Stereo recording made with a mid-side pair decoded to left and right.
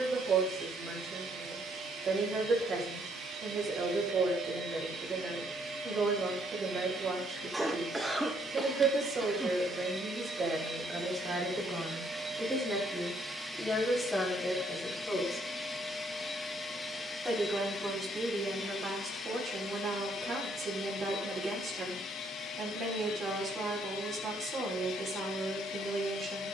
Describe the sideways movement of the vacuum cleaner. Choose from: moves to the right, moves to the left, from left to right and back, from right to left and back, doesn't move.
moves to the left.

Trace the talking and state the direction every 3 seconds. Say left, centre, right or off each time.
right, right, right, right, centre, centre, right, right, right.